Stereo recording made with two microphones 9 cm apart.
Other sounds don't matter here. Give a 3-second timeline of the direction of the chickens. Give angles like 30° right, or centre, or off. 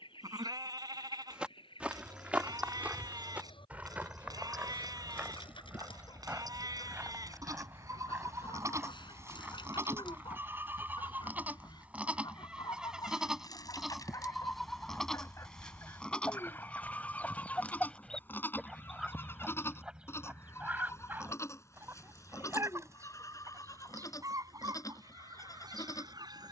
80° left, 70° left, 70° left, 60° left, 50° left, 20° left, 10° right, 30° right, 50° right.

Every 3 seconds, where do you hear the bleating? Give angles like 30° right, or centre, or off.
50° right, 50° right, 40° right, 20° right, centre, 10° left, 30° left, 40° left, 40° left.